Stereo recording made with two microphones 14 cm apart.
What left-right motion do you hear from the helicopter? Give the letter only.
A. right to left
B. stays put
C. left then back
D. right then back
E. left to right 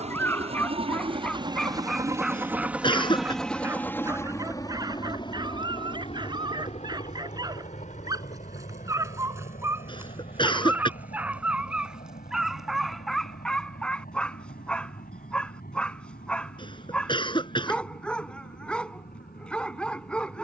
A.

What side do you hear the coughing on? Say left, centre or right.
left.